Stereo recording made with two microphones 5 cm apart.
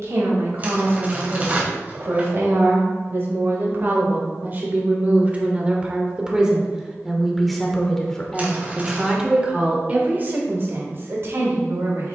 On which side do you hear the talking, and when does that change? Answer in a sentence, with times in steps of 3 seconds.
You can hear the talking on the right from 0 s, in the centre from 6 s and on the right from 9 s.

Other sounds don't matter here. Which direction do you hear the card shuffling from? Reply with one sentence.
In this clip you hear the card shuffling on the right.